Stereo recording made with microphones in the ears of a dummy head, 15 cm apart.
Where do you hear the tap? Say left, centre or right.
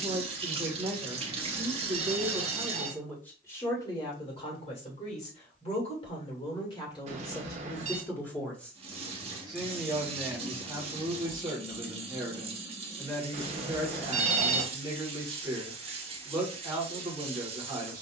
right.